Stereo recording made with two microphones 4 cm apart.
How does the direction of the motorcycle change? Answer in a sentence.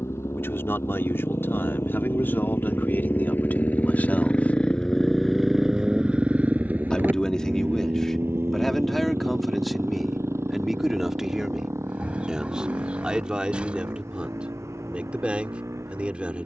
You can hear the motorcycle move from left to right.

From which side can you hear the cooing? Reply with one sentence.
You can hear the cooing on the right.